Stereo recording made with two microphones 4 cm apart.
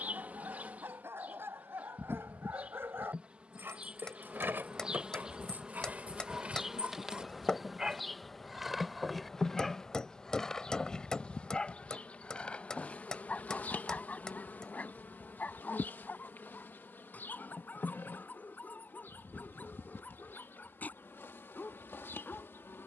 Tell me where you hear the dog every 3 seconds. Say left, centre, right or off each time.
right, right, right, centre, left, left, left, left.